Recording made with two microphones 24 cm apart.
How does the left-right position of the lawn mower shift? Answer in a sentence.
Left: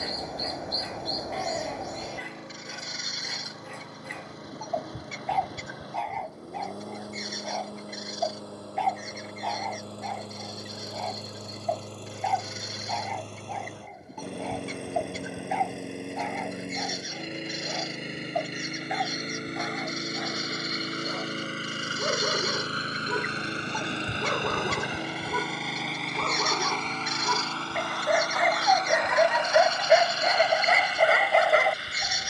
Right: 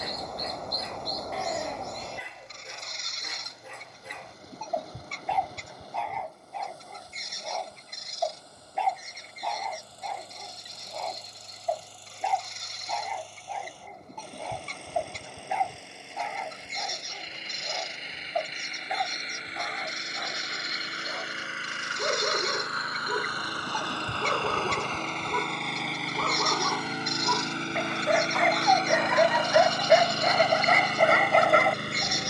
You can hear the lawn mower move from left to right.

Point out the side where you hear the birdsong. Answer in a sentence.
In this clip you hear the birdsong in the centre.